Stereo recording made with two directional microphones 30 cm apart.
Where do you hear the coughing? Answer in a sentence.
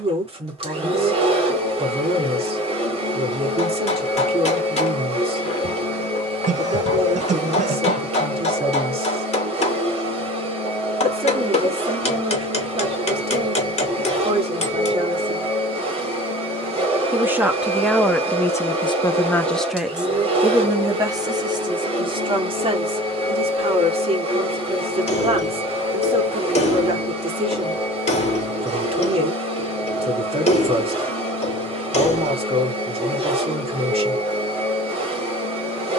You can hear the coughing on the right.